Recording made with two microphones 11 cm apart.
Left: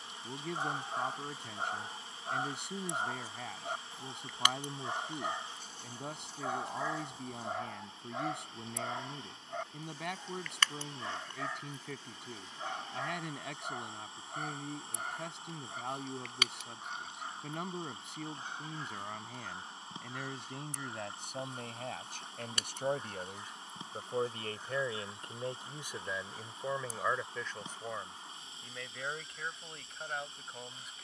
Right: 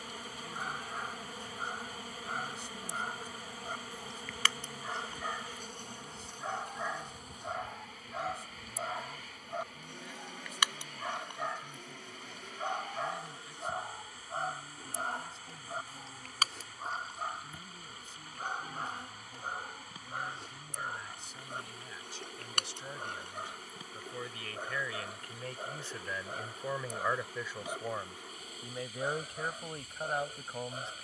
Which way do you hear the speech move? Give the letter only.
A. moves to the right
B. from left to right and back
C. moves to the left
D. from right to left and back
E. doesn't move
A.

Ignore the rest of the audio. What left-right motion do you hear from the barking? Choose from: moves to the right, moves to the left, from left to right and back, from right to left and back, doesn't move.
moves to the right.